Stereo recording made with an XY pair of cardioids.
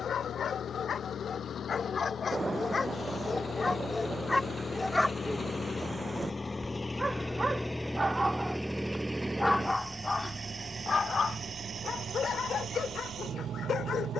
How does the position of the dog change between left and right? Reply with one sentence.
In this clip you hear the dog move from left to right and back again.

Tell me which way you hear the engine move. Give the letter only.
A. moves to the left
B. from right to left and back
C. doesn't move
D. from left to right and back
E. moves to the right
E.